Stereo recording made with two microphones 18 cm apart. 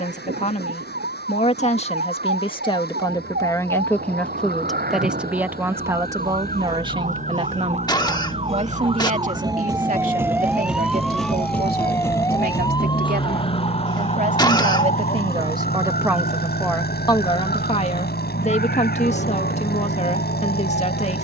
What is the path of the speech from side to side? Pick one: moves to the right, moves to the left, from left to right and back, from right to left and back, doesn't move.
from left to right and back.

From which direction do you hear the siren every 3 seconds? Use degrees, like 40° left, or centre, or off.
70° right, 60° right, 40° right, 10° right, 30° left, 50° left, 60° left.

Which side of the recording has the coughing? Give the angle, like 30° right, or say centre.
20° left.